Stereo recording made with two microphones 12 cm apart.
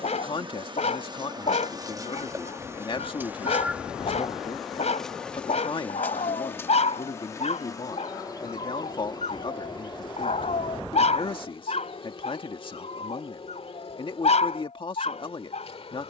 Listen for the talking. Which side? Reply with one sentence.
You can hear the talking on the left.